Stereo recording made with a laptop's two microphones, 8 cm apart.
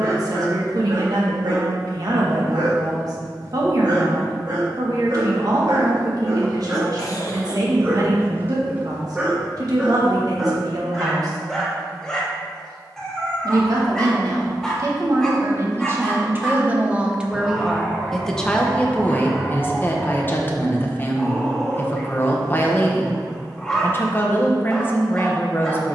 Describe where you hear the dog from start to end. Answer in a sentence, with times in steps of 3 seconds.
You can hear the dog on the right from 0 s and in the centre from 9 s.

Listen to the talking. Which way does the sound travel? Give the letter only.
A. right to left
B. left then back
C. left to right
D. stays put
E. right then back
A.